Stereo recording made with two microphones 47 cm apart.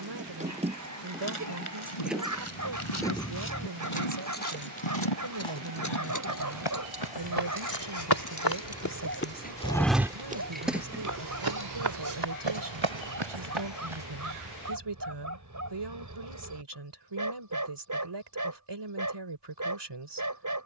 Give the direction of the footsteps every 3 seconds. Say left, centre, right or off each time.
left, left, left, right, right, off, off.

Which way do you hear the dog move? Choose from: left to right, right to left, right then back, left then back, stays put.
stays put.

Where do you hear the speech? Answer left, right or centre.
right.